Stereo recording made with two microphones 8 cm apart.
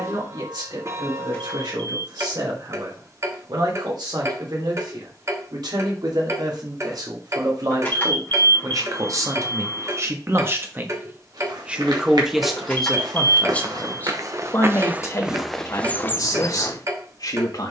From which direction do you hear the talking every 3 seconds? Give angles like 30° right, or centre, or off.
70° right, 70° right, 60° right, 30° right, 10° left, 50° left.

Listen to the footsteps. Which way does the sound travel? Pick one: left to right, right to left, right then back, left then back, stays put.
right to left.